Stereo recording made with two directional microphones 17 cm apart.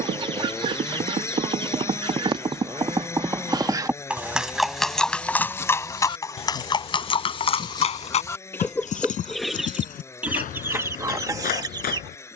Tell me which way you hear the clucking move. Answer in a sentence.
In this clip you hear the clucking move from right to left and back again.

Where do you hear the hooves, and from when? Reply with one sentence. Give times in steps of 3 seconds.
You can hear the hooves on the right from 0 s, in the centre from 3 s and on the left from 6 s.